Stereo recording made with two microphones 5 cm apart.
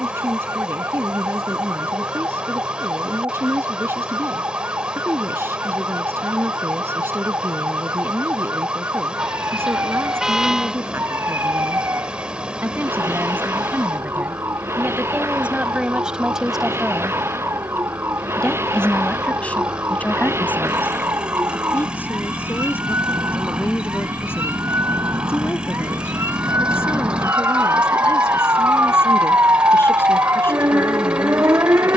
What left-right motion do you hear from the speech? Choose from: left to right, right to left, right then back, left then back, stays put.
right to left.